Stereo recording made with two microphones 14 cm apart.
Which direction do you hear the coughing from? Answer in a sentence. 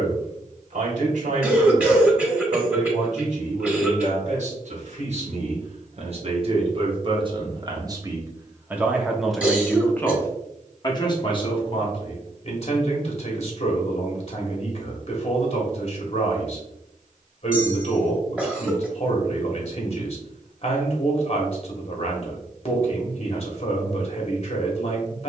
You can hear the coughing in the centre.